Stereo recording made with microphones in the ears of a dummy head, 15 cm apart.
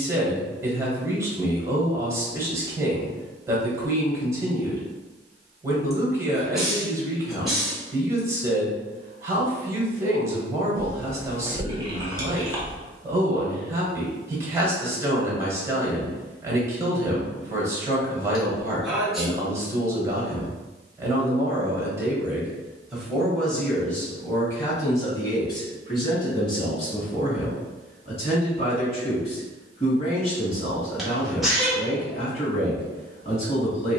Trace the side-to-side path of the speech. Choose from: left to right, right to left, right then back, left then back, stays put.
right to left.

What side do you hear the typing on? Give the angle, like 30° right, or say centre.
20° right.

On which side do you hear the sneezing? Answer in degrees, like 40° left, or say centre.
centre.